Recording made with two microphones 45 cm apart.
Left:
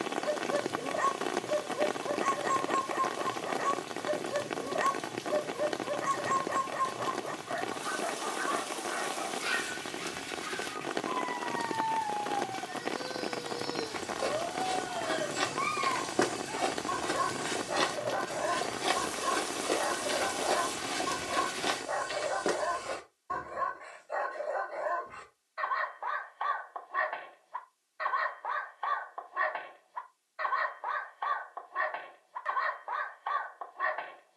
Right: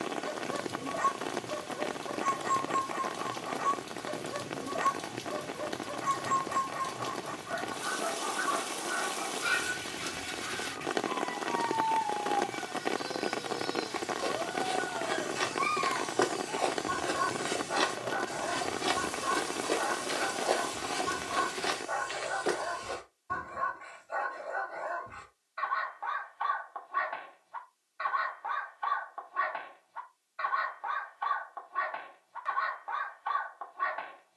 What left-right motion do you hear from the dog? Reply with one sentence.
You can hear the dog stay in one place.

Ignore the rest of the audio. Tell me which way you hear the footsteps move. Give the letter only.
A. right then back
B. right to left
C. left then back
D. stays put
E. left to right
A.